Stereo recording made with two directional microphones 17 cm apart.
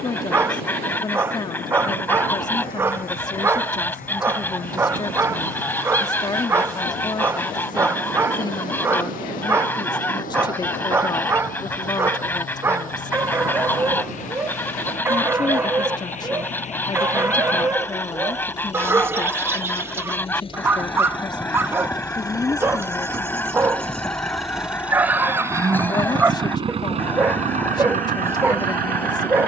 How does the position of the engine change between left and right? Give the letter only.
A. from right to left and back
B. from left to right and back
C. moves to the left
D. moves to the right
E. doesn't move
D.